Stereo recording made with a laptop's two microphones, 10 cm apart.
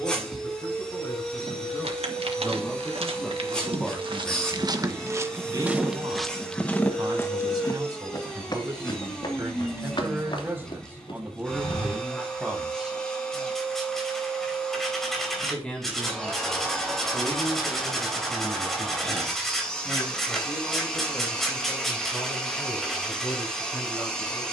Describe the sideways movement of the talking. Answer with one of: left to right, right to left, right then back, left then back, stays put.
right then back.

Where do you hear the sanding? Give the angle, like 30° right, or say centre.
centre.